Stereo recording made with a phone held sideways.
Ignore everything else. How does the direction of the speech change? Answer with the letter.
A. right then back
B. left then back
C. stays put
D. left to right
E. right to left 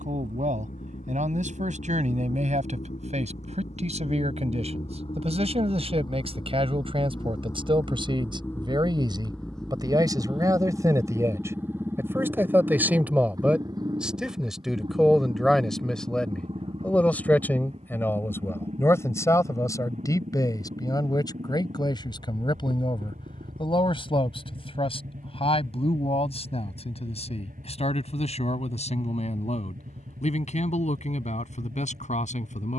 E.